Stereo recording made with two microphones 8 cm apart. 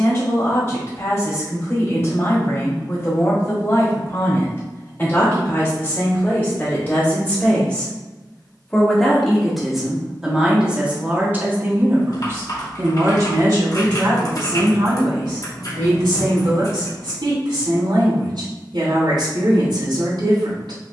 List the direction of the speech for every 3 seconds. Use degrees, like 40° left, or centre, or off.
40° left, 30° left, 20° left, 10° right, 50° right, 80° right, 80° right.